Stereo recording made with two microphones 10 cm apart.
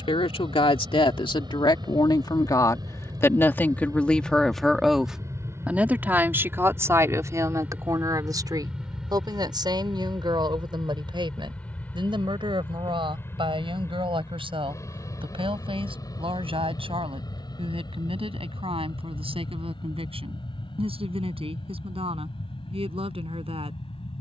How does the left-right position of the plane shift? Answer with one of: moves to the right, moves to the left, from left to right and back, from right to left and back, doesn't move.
moves to the left.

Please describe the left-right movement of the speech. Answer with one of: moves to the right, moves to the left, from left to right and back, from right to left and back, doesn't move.
moves to the right.